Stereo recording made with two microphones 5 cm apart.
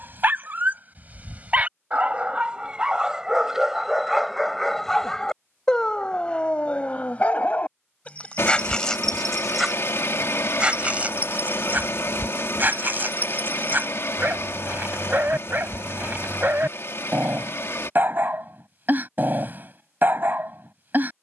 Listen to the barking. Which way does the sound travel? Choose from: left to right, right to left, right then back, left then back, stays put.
left then back.